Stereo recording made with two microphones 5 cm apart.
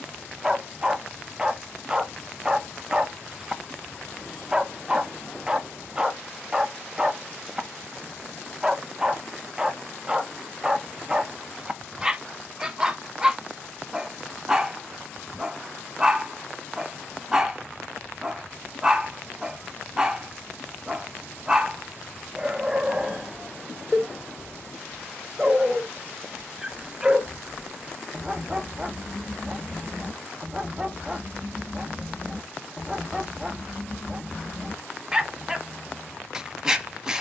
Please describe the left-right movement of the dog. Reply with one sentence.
You can hear the dog stay in one place.